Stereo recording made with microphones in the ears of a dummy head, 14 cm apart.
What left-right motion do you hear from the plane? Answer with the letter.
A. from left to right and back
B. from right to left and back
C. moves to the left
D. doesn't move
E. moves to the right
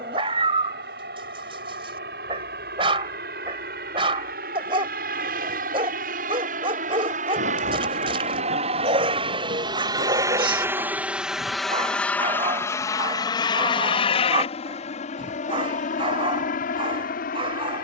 C.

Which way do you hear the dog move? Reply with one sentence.
In this clip you hear the dog stay in one place.